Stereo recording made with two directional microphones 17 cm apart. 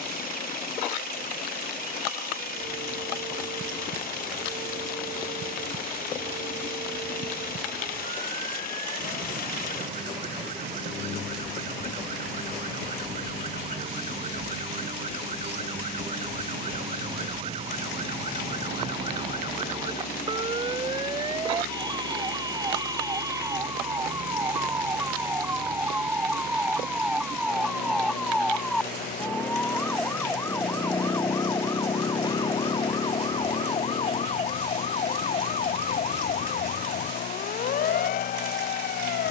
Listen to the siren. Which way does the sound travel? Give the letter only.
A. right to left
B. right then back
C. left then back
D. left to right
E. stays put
A.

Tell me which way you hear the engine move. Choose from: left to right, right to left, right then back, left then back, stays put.
stays put.